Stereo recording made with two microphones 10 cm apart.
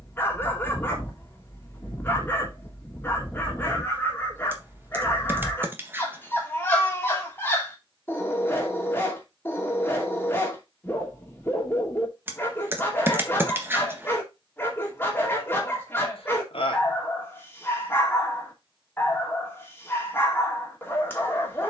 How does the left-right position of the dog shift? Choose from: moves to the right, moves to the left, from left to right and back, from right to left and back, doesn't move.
doesn't move.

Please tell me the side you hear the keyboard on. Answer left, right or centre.
right.